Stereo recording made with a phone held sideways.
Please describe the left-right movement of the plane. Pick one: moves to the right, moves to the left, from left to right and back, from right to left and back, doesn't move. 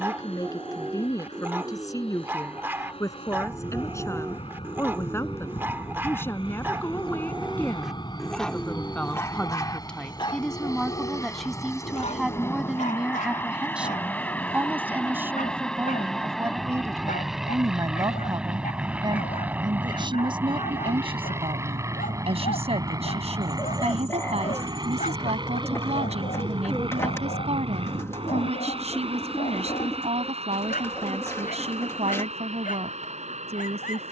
moves to the right.